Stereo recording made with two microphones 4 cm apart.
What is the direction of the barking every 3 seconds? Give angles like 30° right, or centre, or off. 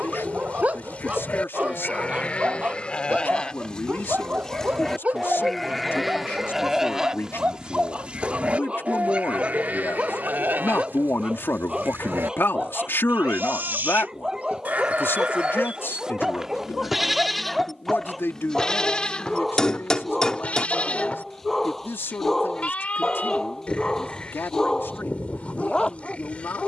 30° right, 30° right, 30° right, 20° right, 10° right, 10° right, centre, 10° left, 20° left.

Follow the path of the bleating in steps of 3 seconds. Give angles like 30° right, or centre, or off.
30° left, 20° left, 20° right, 50° right, 50° right, 10° right, 30° left, 30° left, 30° left.